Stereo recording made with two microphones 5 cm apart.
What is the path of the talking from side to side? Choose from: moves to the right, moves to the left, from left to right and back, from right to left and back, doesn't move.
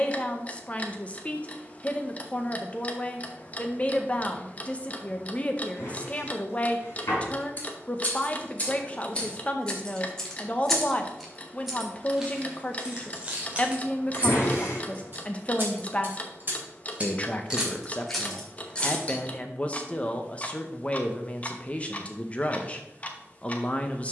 doesn't move.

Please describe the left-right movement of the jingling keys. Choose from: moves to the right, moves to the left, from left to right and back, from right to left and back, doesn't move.
from left to right and back.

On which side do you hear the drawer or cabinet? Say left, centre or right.
left.